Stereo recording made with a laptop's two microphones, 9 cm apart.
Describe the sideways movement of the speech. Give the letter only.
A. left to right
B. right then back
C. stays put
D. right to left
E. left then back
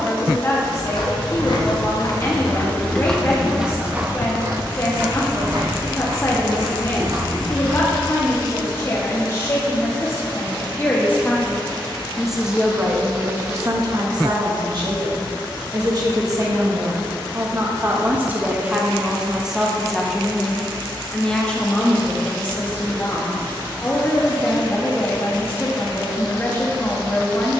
B.